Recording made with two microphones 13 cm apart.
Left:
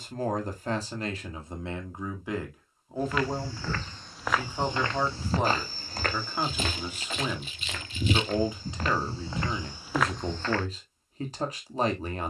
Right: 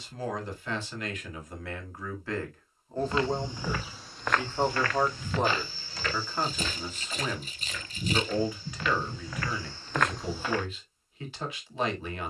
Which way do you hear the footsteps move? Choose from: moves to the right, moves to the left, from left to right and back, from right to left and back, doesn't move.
from right to left and back.